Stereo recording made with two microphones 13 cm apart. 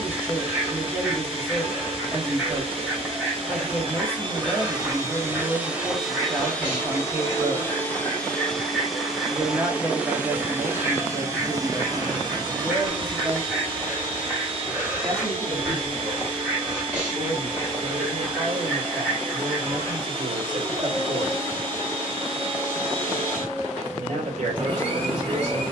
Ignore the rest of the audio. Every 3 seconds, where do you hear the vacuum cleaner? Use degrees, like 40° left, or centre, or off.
40° right, 30° right, 10° left, 20° right, 40° right, 40° right, 40° right, 40° right, 40° right.